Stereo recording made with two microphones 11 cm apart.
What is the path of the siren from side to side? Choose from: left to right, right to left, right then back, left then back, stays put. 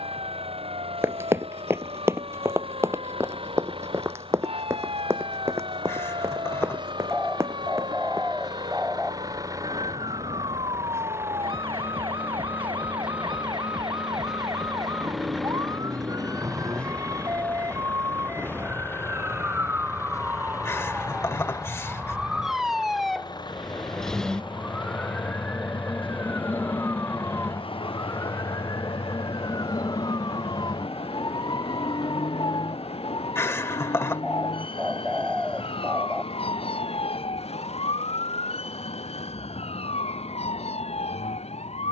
right to left.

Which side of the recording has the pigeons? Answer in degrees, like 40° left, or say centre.
centre.